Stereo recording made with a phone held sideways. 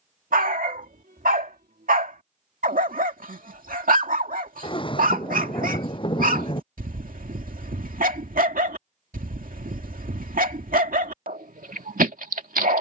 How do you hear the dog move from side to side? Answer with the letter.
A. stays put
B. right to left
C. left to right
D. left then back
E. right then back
A.